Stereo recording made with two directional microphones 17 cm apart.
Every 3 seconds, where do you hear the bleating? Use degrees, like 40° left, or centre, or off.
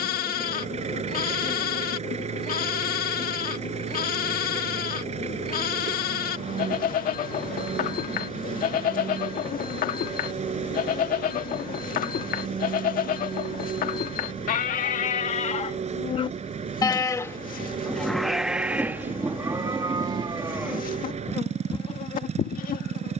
60° left, 60° left, 60° left, 60° left, 60° left, 30° left, 10° right, 50° left.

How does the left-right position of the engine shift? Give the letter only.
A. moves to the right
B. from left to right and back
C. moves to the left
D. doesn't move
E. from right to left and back
D.